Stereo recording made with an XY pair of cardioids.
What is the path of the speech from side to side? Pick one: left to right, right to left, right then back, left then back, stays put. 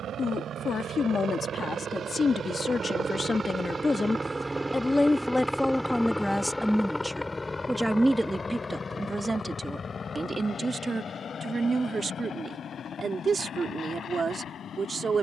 left to right.